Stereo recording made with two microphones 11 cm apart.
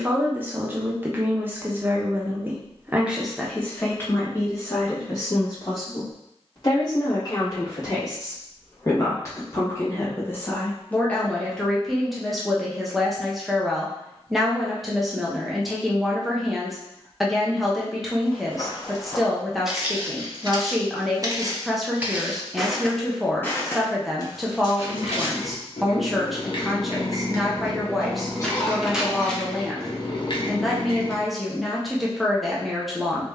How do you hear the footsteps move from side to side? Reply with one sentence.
You can hear the footsteps move from left to right and back again.